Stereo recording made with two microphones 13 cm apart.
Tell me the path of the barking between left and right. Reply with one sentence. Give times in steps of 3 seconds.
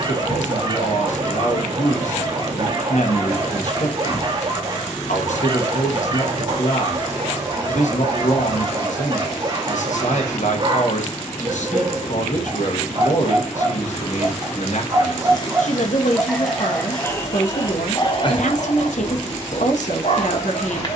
You can hear the barking on the right from 0 s, in the centre from 15 s and on the left from 18 s.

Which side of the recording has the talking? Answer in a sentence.
In this clip you hear the talking on the left.